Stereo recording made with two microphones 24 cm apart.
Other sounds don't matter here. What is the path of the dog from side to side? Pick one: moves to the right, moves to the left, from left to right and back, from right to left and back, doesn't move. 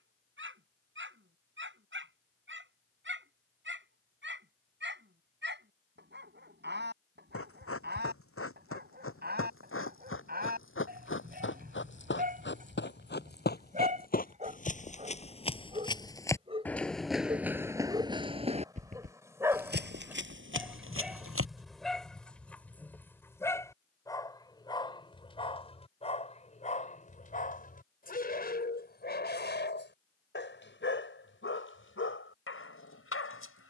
moves to the left.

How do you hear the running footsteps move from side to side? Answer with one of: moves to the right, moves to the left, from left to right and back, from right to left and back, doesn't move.
moves to the right.